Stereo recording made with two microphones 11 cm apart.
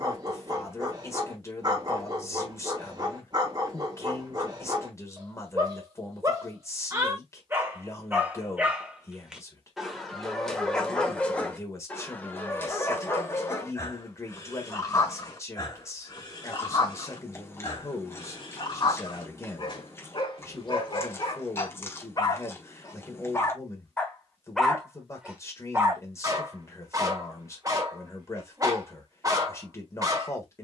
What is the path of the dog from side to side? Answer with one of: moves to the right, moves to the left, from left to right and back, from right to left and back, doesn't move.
from right to left and back.